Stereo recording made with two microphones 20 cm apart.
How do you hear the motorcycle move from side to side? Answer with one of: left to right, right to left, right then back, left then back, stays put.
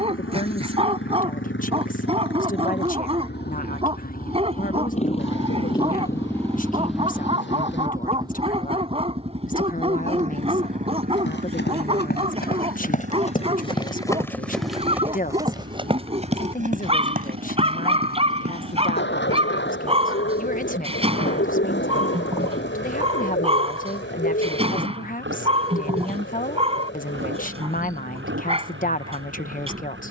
left to right.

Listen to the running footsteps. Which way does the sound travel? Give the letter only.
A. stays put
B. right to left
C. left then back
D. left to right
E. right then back
D.